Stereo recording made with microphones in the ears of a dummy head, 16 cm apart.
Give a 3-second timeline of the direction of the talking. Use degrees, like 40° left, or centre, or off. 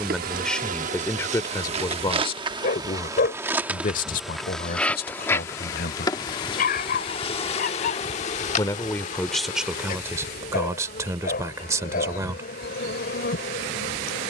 20° left, 50° left, 30° left, 10° right, 20° right.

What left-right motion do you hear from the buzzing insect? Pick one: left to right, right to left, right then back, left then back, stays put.
right to left.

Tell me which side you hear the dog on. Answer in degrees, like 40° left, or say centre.
50° left.